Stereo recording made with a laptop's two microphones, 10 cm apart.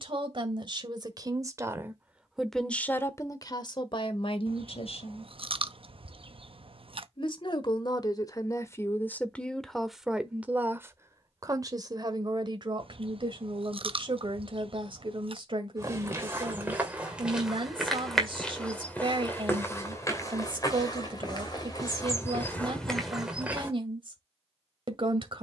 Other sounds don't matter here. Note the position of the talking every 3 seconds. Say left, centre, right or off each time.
right, left, left, centre, right, right, right, right, right.